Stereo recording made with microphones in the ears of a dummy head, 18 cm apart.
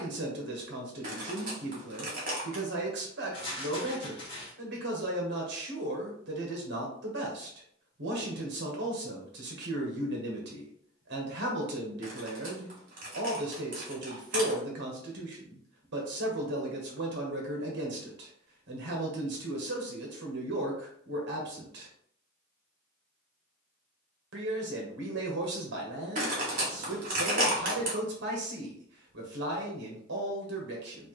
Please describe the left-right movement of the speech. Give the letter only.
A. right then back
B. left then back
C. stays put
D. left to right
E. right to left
C.